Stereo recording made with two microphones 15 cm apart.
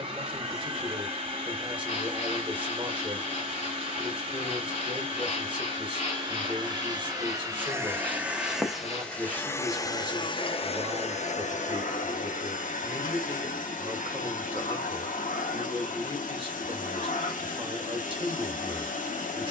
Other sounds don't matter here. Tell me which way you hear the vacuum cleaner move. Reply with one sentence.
In this clip you hear the vacuum cleaner move to the left.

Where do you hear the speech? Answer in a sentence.
You can hear the speech on the right.